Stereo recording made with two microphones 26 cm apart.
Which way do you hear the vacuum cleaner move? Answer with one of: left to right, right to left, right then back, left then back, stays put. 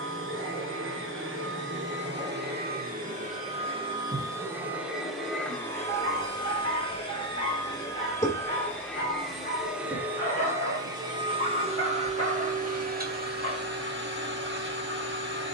left then back.